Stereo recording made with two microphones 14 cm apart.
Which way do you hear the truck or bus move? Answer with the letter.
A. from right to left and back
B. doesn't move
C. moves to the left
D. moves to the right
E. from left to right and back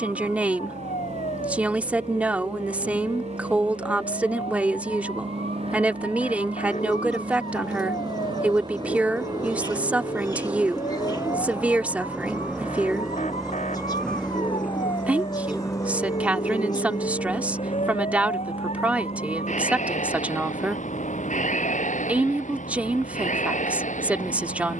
C.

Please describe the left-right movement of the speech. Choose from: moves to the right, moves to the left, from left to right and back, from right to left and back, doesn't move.
doesn't move.